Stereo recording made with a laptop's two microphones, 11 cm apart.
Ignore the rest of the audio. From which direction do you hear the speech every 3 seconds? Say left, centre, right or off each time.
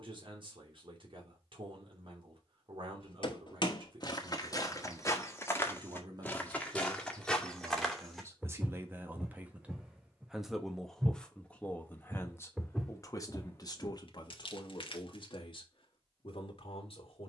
right, right, right, centre, left, left.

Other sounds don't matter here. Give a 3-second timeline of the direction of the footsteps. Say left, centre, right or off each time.
off, left, centre, centre, centre, off.